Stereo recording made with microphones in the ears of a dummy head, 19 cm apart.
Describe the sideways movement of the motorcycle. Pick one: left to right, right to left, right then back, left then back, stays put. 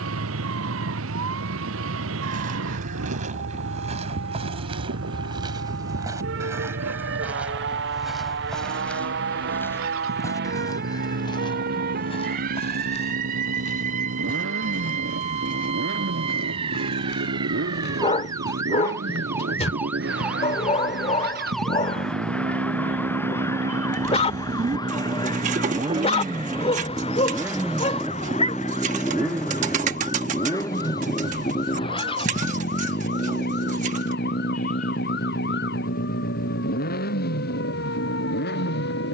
right to left.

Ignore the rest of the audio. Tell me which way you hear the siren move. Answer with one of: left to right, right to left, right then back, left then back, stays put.
right to left.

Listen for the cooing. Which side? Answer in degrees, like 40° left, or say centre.
40° right.